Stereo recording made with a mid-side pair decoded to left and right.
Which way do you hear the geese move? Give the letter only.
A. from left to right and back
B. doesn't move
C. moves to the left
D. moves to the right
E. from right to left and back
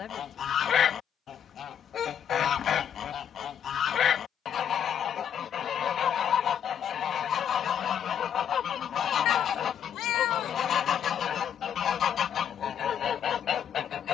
B.